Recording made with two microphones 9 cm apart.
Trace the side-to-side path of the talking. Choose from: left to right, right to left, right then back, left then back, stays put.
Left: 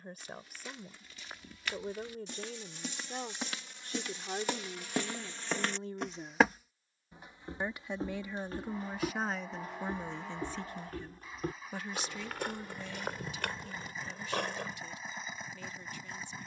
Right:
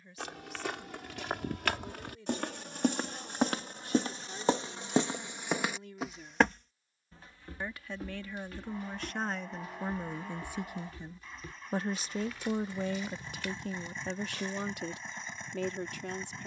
left to right.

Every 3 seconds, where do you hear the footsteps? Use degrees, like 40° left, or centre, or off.
60° right, 30° right, 20° left, 50° left, 60° left, off.